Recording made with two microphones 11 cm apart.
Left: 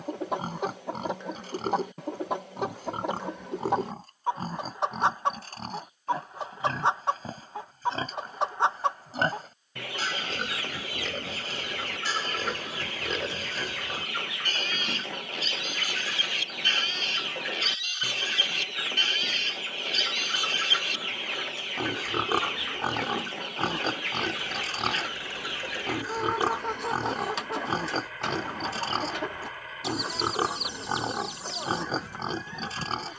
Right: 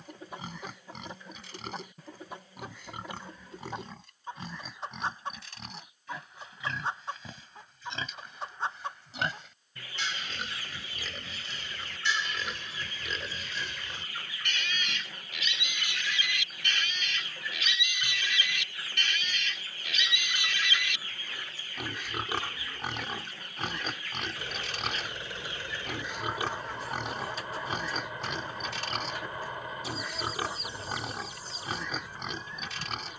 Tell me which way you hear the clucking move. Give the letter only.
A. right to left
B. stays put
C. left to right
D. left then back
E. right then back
B.